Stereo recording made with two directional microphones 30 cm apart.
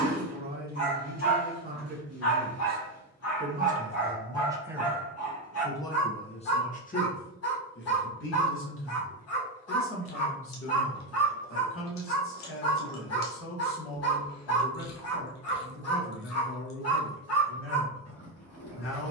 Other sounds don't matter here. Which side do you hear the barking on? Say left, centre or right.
left.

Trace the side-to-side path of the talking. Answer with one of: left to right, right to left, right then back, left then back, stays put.
right to left.